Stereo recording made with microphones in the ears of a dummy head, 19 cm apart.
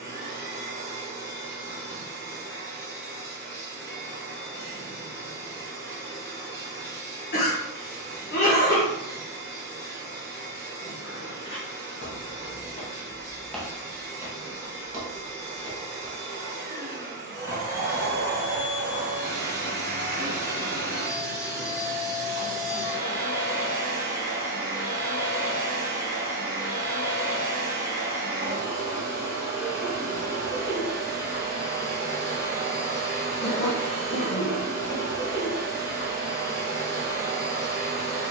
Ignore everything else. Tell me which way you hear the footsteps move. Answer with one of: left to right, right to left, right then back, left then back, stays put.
left to right.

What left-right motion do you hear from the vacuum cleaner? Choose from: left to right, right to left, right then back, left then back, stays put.
stays put.